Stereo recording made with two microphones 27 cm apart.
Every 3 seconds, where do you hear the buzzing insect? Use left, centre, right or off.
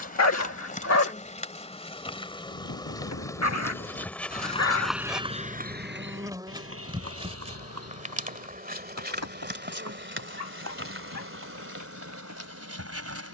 left, centre, right, right, right.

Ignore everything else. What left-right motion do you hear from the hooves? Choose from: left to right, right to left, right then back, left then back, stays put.
left to right.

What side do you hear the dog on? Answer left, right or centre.
left.